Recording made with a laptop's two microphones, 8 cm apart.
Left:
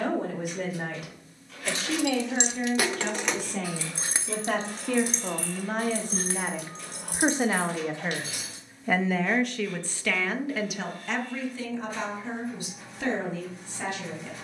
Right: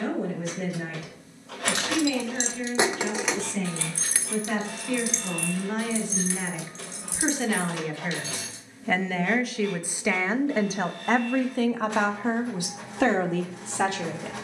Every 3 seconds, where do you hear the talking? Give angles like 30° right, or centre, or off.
50° left, 40° left, 30° left, 30° right, 70° right.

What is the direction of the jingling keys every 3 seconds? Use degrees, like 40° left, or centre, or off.
40° right, 20° left, 50° left, off, off.